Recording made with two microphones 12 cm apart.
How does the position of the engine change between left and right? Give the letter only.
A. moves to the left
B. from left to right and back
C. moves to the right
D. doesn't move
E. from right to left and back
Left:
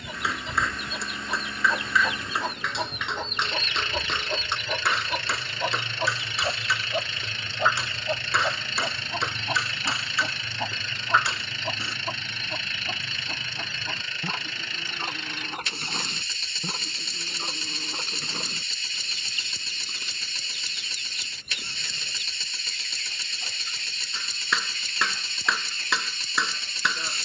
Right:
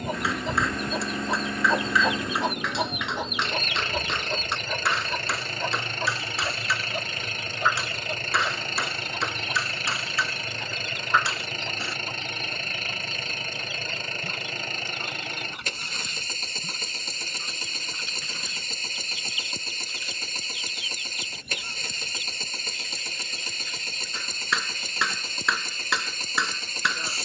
D.